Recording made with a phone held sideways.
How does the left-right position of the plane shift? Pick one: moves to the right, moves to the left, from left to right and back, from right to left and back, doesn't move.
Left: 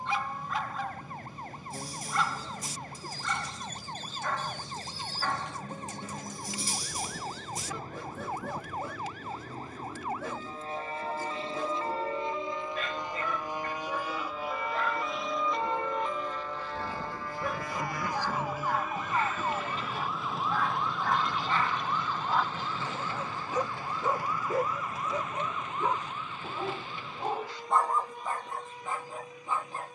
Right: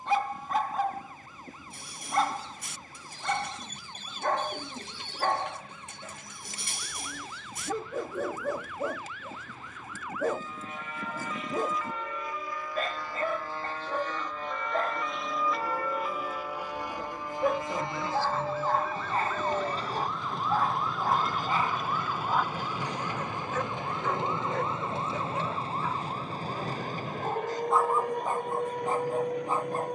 moves to the right.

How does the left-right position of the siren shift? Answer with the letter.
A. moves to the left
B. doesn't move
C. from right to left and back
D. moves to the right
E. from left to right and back
D.